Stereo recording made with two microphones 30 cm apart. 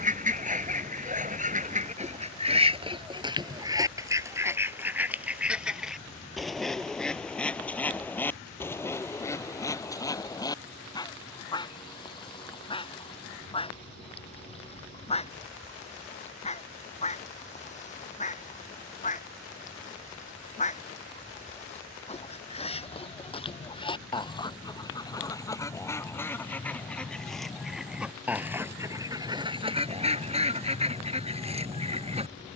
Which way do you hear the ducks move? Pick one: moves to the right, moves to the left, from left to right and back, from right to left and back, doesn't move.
from right to left and back.